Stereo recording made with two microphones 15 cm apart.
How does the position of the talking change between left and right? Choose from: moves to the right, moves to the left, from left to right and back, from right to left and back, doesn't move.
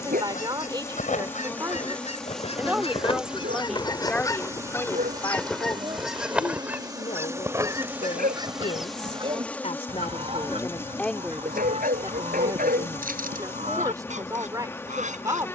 from right to left and back.